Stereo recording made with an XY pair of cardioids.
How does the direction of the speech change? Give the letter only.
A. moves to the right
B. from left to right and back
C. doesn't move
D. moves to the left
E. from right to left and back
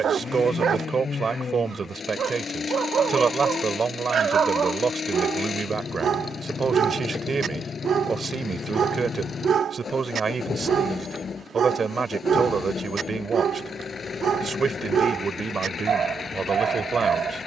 C.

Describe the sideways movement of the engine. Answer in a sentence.
You can hear the engine stay put.